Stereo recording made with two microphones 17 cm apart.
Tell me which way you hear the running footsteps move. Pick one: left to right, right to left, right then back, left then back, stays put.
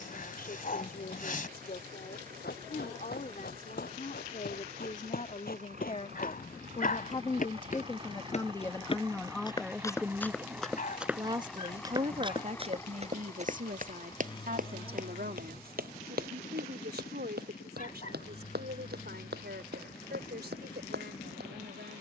left to right.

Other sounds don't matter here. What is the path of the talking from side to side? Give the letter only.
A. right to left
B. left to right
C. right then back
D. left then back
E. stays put
B.